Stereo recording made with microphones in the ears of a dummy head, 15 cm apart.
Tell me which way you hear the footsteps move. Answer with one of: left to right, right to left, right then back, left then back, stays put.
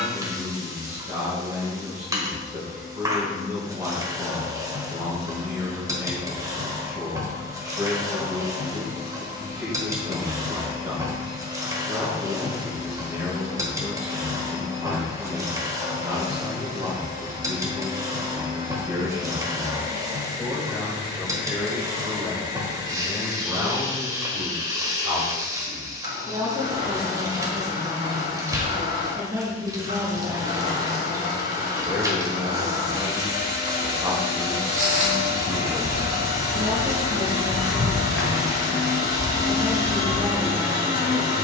right to left.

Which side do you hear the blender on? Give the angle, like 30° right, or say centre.
30° right.